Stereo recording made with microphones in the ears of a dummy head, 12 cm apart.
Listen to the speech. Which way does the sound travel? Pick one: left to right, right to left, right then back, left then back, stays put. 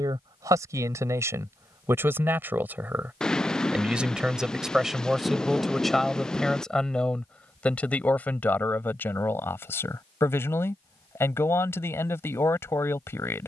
right to left.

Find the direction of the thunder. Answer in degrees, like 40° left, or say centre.
10° left.